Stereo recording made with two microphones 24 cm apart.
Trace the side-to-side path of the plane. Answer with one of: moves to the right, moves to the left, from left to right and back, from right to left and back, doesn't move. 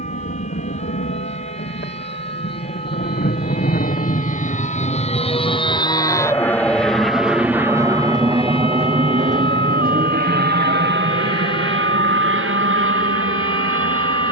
moves to the right.